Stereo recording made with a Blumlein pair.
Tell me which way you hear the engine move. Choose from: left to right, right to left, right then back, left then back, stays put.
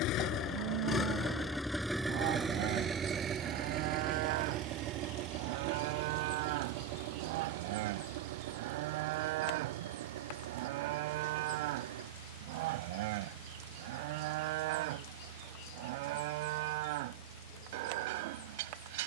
left to right.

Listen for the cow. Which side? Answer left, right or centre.
right.